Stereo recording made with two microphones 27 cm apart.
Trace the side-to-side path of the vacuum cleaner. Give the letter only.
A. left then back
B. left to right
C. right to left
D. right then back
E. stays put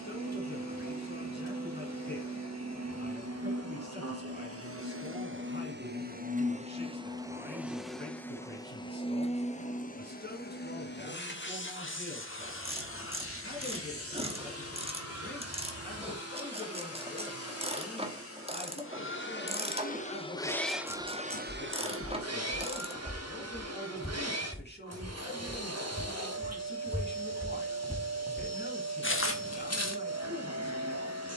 A.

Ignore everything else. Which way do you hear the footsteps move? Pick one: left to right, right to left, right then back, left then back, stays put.
right then back.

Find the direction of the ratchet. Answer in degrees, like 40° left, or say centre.
20° right.